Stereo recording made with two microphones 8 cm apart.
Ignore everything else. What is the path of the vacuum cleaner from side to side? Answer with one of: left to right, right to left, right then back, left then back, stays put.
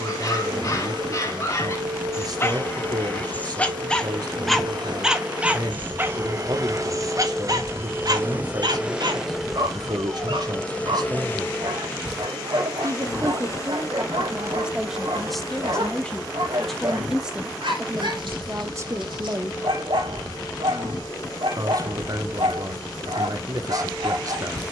right to left.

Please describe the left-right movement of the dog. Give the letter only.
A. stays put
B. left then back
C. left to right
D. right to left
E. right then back
C.